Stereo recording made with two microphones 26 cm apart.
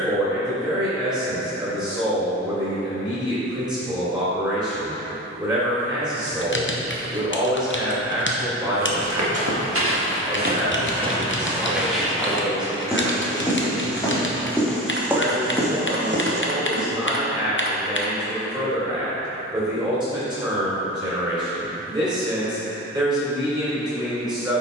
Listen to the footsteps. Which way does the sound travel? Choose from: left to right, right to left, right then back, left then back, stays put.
left then back.